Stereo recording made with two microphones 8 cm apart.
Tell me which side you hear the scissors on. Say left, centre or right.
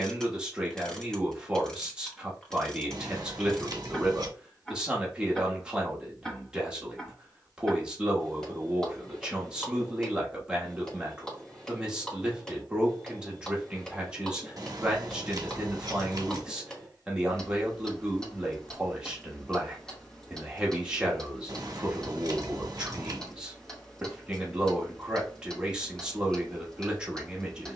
right.